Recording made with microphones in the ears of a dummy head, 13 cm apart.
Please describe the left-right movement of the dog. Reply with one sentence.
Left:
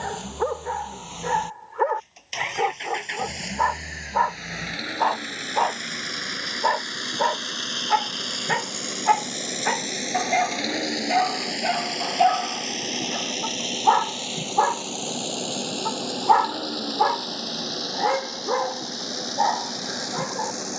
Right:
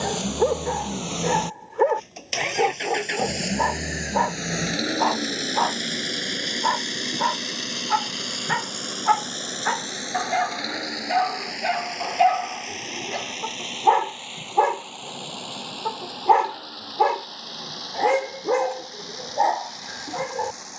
In this clip you hear the dog move from right to left and back again.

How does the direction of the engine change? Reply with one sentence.
You can hear the engine move from right to left.